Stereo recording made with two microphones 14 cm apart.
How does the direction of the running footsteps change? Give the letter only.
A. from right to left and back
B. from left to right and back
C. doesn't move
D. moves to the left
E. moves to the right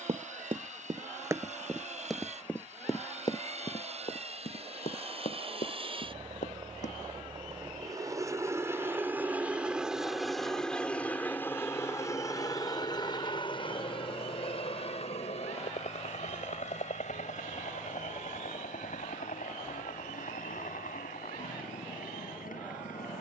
D.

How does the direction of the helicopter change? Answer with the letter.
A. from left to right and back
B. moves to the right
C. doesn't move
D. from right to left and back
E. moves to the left
E.